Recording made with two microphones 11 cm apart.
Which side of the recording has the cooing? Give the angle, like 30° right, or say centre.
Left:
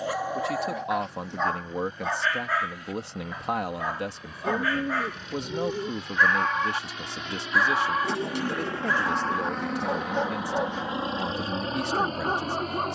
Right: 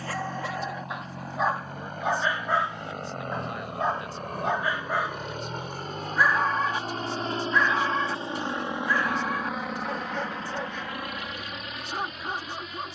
70° left.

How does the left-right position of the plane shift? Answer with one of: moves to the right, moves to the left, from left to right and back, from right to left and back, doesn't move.
moves to the left.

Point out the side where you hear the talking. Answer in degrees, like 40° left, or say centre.
70° left.